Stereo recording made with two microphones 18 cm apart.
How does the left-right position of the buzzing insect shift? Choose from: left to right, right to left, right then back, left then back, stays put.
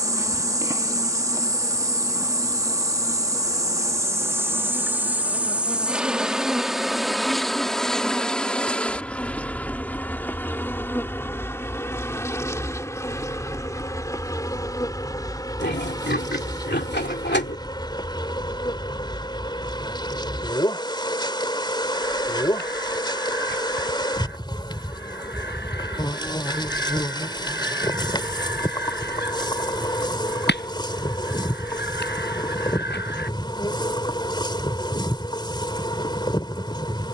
right to left.